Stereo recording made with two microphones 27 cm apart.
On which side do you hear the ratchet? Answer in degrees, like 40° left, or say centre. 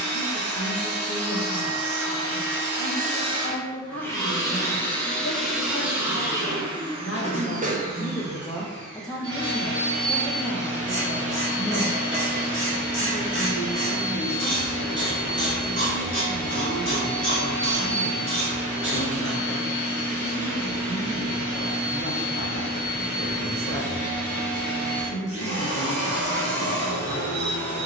40° right.